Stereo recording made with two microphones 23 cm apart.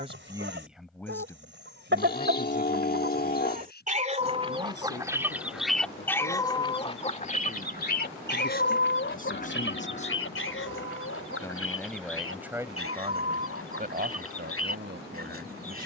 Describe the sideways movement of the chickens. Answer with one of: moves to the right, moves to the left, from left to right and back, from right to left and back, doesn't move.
moves to the left.